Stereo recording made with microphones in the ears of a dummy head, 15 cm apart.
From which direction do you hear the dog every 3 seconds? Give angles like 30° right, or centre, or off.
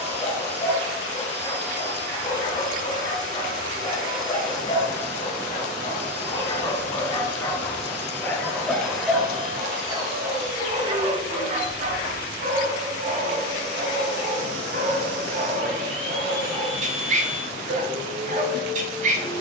30° left, 30° left, 20° left, 20° right, 50° right, 50° right, 50° right.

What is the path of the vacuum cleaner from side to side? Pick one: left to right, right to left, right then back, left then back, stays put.
stays put.